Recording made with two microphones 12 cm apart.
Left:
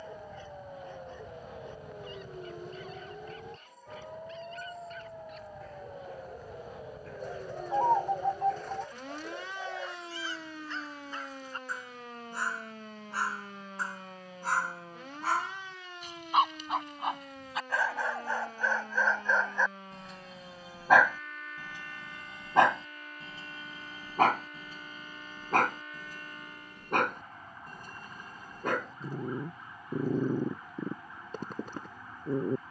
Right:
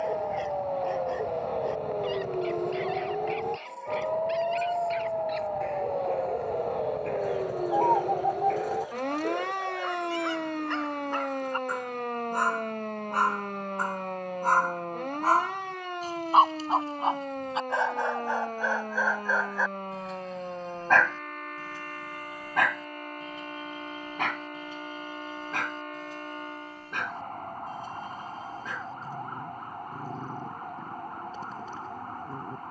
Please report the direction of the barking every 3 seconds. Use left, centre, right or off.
right, right, right, right, right, right, centre, left, left, left, left.